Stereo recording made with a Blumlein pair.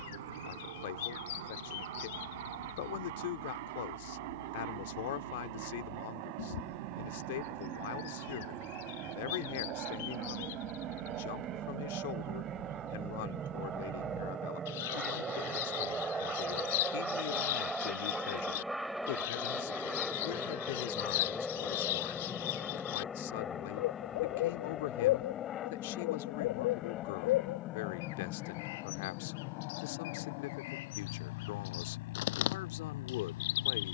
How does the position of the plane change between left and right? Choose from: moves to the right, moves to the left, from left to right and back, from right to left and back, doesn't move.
moves to the left.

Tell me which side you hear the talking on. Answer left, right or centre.
left.